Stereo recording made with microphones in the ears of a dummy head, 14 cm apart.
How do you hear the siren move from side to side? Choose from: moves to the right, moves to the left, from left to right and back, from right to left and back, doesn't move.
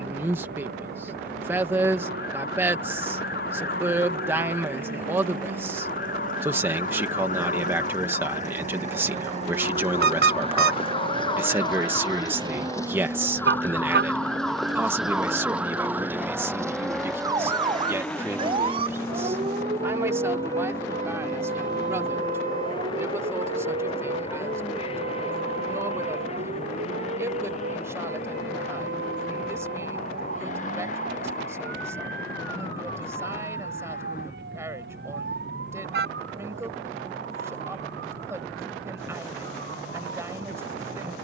moves to the right.